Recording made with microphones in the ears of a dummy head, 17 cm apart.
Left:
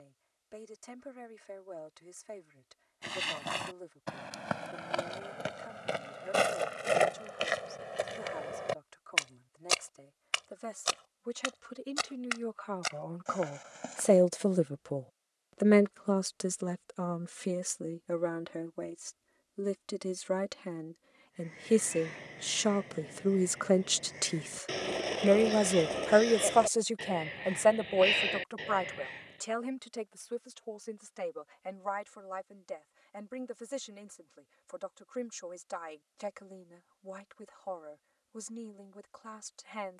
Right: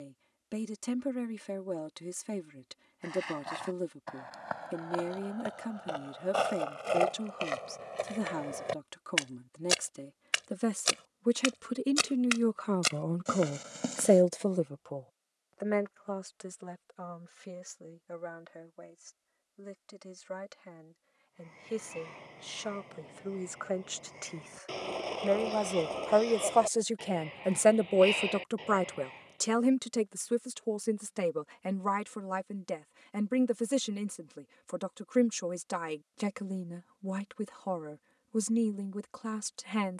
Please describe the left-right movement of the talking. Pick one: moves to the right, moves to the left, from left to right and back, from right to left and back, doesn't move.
from right to left and back.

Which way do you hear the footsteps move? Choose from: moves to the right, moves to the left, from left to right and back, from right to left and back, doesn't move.
moves to the right.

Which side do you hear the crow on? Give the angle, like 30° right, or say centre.
20° left.